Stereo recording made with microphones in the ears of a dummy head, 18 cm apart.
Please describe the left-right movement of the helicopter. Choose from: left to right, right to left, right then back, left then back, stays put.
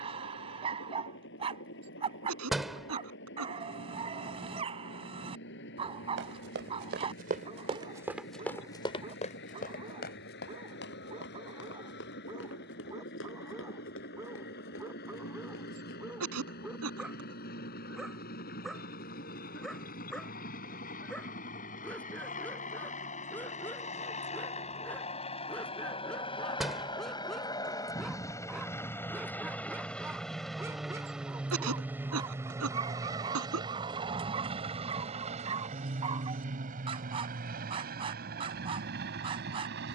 left to right.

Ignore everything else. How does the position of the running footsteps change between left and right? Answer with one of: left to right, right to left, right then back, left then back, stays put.
right to left.